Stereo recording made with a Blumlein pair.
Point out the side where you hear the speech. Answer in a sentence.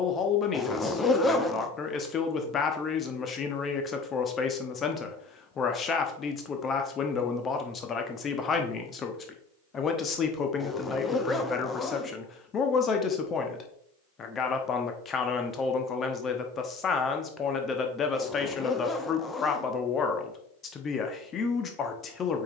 You can hear the speech on the left.